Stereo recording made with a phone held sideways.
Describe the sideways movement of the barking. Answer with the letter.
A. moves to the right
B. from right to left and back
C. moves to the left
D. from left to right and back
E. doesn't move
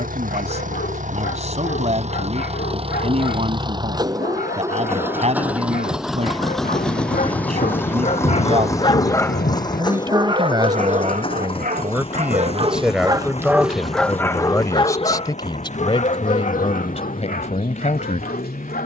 D.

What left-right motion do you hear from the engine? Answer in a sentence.
You can hear the engine travel towards the left.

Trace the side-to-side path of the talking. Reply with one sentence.
You can hear the talking go from the right side to the left.